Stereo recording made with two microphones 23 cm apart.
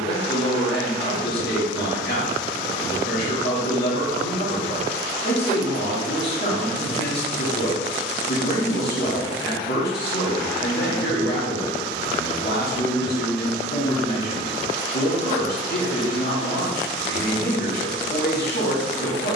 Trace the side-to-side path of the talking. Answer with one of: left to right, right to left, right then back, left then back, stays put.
stays put.